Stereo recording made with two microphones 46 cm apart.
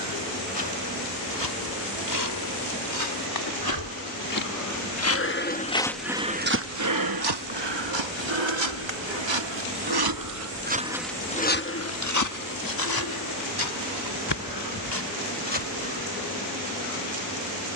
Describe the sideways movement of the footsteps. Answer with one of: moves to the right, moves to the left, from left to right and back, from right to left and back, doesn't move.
from left to right and back.